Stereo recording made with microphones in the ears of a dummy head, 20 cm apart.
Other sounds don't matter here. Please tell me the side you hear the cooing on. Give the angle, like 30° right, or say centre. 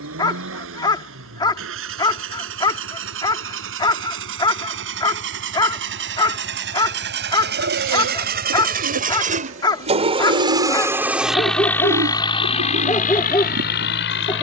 60° right.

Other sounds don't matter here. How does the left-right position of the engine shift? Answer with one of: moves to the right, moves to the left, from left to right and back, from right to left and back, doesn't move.
moves to the left.